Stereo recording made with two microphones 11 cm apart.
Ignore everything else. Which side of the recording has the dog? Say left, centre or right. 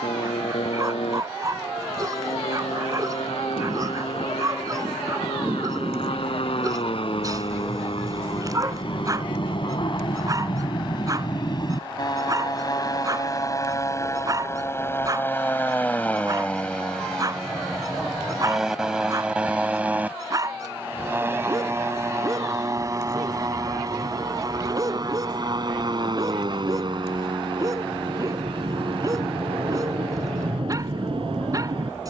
right.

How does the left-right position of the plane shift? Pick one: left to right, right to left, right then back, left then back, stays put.
left to right.